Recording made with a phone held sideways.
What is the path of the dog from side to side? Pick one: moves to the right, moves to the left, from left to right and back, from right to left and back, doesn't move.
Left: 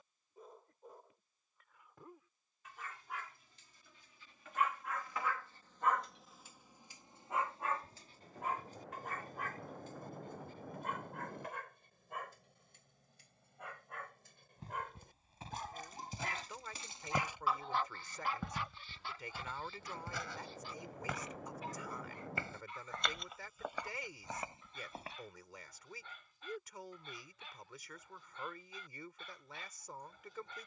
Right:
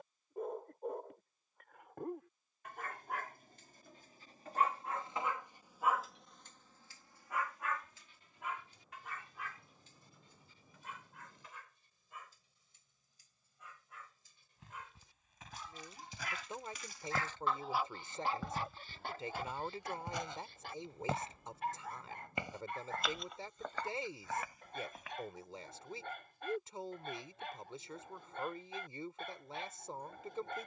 from right to left and back.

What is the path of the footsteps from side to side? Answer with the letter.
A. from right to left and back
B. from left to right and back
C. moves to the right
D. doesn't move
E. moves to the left
B.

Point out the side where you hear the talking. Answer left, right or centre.
right.